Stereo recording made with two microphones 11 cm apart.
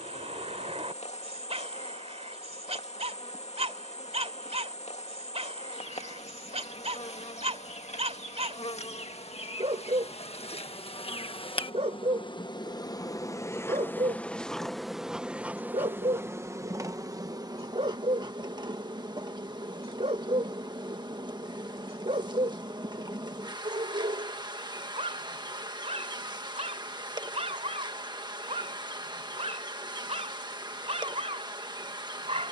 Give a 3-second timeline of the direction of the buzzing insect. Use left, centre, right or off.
left, left, left, left, left, right, right, right, right, right, right.